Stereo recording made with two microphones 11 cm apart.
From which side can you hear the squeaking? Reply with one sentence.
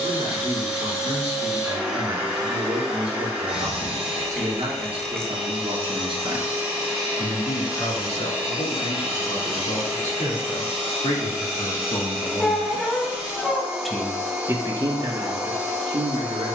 You can hear the squeaking in the centre.